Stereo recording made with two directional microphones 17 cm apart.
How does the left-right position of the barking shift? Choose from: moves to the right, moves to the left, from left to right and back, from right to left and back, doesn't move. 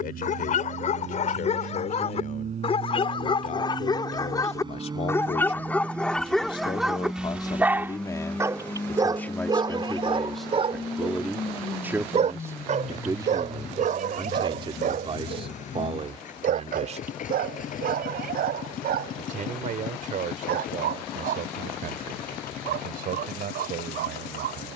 moves to the right.